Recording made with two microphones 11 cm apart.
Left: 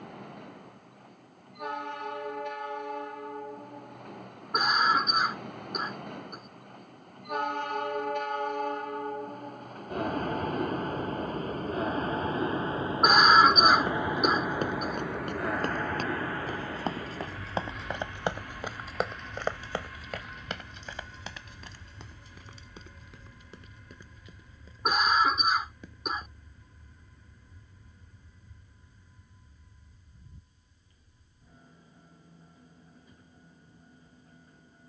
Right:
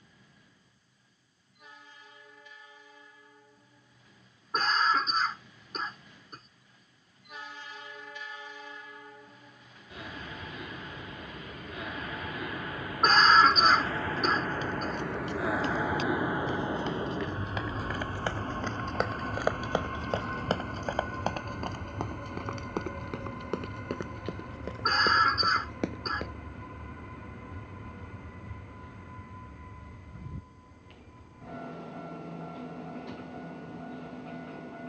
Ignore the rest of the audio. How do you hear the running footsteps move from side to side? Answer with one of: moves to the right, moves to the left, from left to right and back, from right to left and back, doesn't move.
moves to the right.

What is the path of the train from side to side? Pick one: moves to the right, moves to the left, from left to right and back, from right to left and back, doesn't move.
moves to the right.